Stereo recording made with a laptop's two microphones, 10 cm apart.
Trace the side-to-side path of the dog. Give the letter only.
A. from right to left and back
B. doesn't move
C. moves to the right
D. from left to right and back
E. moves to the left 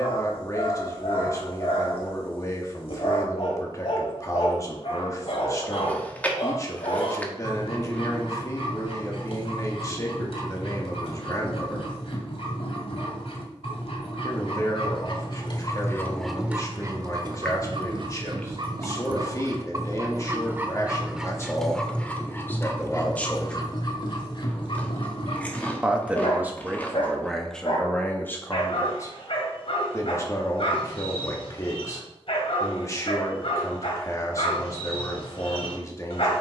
D.